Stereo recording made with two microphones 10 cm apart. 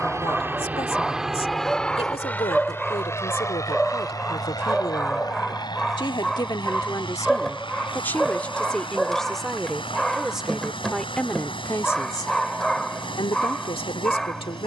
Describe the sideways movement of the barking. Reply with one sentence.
You can hear the barking stay put.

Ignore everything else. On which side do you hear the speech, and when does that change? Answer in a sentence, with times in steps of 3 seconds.
You can hear the speech on the left from 0 s, in the centre from 9 s and on the left from 12 s.